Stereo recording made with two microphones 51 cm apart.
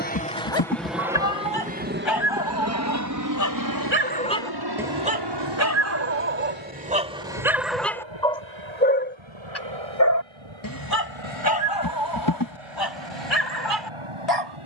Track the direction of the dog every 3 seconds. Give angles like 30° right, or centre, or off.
60° left, centre, 10° right, 40° left, 50° left.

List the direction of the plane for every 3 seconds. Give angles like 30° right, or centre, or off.
10° right, 40° right, 50° right, 60° right, 60° right.